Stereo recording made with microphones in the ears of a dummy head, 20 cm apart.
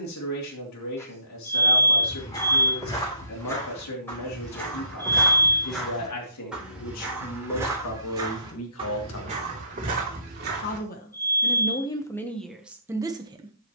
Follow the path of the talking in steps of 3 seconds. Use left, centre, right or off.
left, left, left, left, centre.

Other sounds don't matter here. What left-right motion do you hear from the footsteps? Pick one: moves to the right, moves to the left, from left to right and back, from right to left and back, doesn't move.
moves to the right.